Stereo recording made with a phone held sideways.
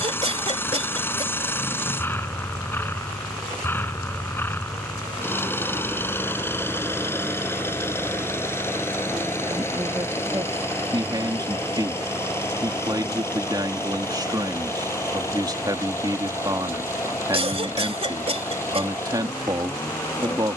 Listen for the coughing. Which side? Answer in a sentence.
You can hear the coughing on the right.